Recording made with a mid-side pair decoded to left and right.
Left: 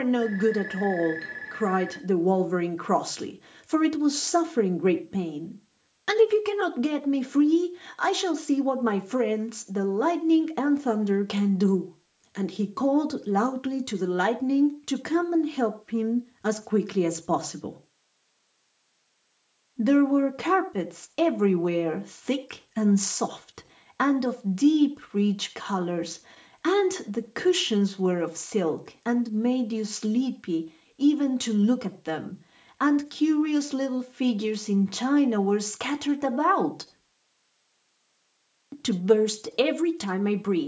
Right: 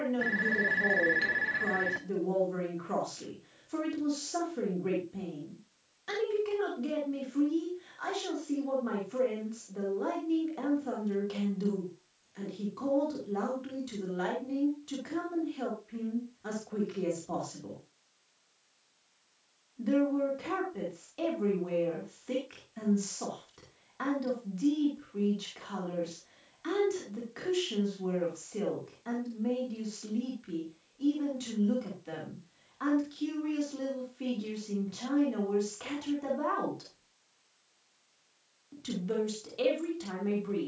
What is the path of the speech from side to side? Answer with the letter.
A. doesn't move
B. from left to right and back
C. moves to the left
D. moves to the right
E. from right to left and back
A.